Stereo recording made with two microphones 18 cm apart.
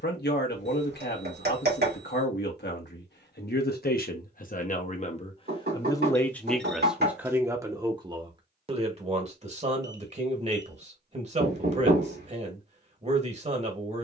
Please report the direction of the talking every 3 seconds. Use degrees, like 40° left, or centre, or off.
70° left, 50° left, 10° right, 40° right, 40° right.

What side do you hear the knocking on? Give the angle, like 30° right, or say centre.
60° right.